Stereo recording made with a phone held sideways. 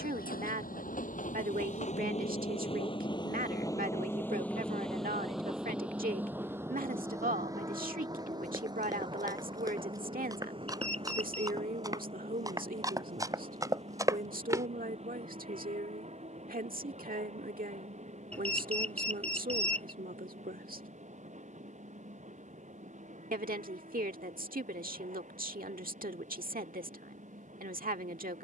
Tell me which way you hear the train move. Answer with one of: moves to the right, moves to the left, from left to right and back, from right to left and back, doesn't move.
moves to the right.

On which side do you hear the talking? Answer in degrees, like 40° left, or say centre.
70° right.